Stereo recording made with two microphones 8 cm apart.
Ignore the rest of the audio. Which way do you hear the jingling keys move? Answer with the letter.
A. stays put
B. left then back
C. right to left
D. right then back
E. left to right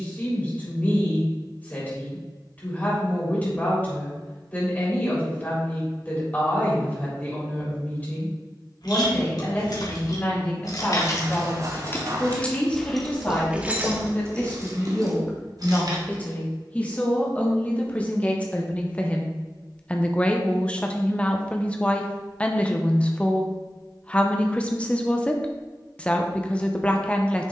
E.